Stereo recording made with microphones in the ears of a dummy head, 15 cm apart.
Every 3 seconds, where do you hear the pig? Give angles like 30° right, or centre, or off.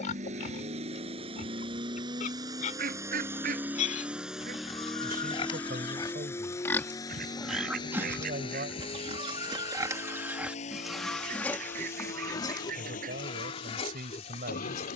50° left, 40° left, centre, 10° right, 30° left.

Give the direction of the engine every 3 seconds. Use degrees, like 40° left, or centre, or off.
30° right, centre, 20° left, 40° left, 50° left.